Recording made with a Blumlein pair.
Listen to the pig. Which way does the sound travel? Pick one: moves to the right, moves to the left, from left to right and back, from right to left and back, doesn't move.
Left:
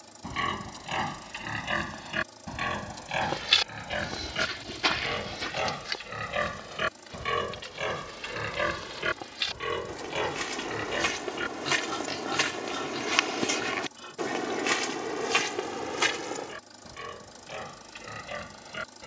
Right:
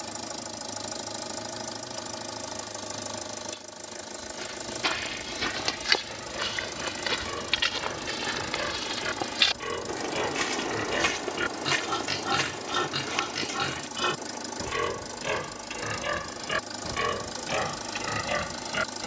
moves to the right.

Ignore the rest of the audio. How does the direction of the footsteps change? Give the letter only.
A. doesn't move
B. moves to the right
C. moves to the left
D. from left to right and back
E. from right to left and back
D.